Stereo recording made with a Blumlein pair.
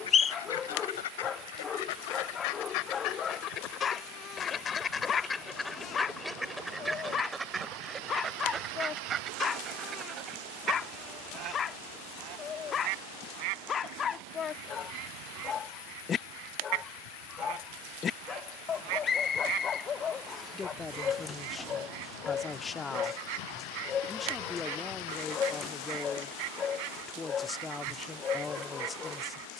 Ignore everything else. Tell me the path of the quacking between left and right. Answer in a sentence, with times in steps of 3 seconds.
You can hear the quacking on the left from 0 s, in the centre from 6 s and on the right from 9 s.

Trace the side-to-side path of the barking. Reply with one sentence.
You can hear the barking stay in one place.